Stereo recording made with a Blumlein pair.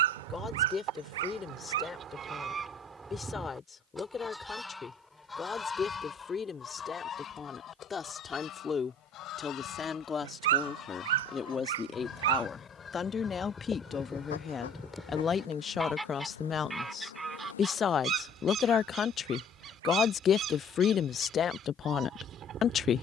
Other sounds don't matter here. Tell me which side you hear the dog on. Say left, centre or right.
right.